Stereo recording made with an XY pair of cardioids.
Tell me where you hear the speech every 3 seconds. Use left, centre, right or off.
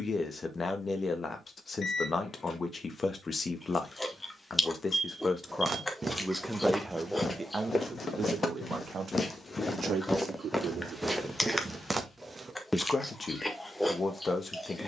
left, left, right, right, left.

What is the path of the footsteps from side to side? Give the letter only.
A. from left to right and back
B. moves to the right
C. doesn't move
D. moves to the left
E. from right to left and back
E.